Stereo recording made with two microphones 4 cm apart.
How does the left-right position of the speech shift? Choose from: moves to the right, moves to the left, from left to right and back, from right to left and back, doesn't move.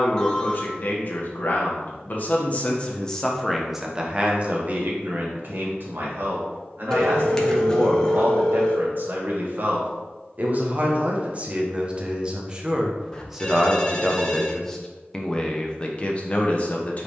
from left to right and back.